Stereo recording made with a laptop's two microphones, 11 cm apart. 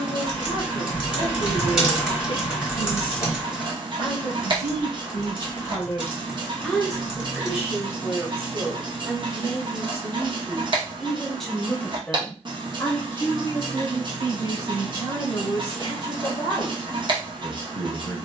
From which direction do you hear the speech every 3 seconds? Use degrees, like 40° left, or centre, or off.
50° left, 40° left, 10° right, 10° right, 30° left, 40° left.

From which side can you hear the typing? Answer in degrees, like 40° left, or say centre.
10° right.